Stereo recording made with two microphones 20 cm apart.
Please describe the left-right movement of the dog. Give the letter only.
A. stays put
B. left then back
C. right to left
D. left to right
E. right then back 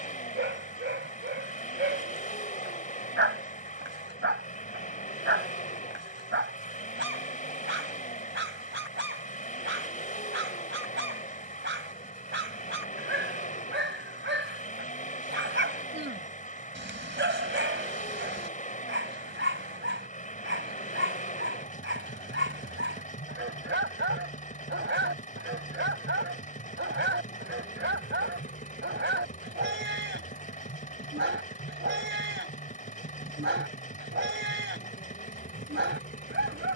A.